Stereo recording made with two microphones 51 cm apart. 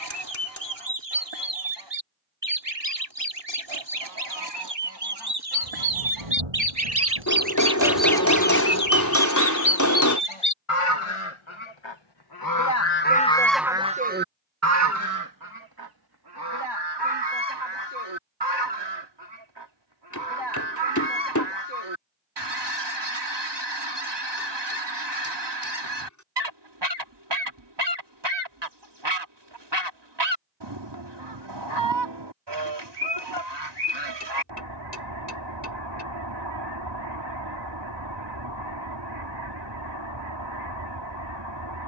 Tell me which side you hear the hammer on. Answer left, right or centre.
left.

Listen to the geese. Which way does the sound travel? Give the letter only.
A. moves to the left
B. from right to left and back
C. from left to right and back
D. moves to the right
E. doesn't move
B.